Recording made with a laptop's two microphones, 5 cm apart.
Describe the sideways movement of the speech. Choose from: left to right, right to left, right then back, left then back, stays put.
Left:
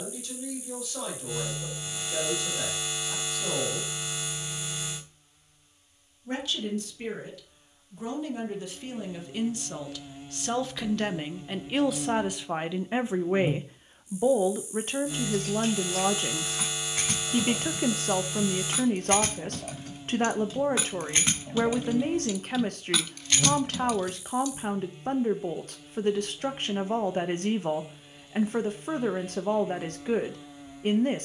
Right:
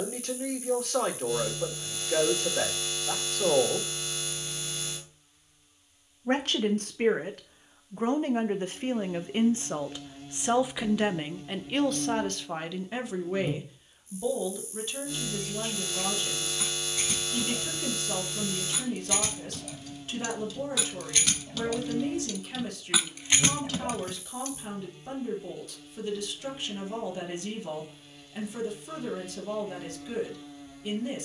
right to left.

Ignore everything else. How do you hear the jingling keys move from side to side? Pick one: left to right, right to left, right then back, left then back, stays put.
left to right.